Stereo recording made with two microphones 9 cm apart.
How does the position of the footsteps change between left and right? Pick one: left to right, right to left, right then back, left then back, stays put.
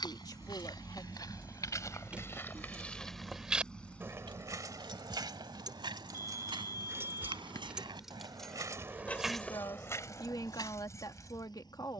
right then back.